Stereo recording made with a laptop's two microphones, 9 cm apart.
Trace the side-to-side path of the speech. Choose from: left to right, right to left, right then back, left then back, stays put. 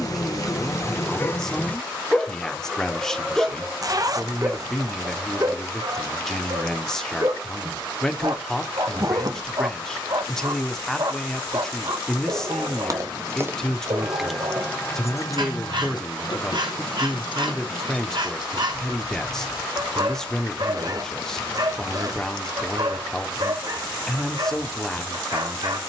stays put.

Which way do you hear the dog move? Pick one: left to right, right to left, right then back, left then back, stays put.
left to right.